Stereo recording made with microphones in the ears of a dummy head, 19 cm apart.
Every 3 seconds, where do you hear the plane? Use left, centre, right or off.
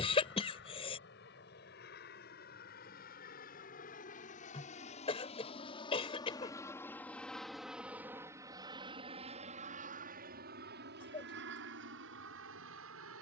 left, left, centre, right, right.